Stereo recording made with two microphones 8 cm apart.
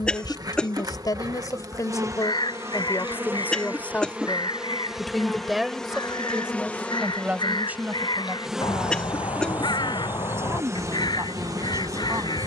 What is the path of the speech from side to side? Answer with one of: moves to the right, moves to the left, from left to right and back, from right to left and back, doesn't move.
moves to the right.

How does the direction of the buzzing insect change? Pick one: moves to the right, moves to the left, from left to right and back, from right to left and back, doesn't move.
from right to left and back.